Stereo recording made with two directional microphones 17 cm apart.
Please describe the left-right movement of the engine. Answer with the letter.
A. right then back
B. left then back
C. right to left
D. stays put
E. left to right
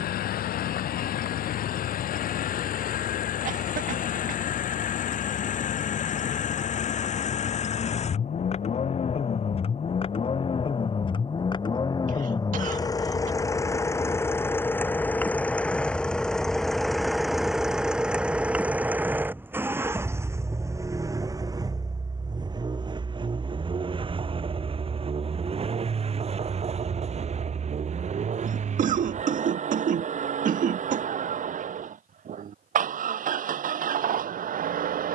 E.